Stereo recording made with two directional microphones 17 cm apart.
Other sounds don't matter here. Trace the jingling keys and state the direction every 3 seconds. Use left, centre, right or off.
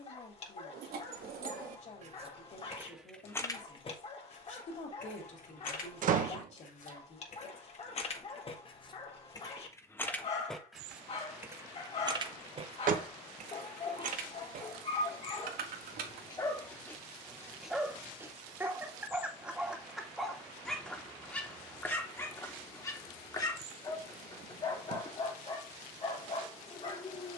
right, left, left, centre, right, right, off, off, off.